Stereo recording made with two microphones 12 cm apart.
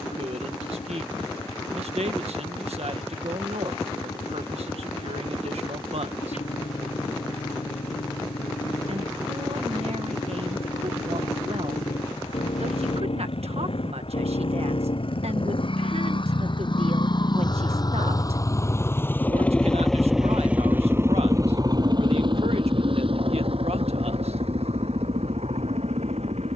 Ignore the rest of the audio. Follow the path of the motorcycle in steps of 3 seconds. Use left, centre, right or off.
left, left, left, left, left, left, centre, right, right.